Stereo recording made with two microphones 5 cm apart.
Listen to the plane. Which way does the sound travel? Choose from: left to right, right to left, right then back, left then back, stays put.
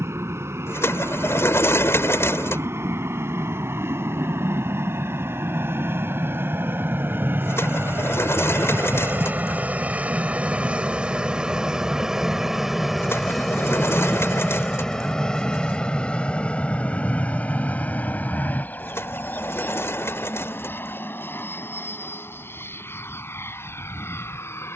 right to left.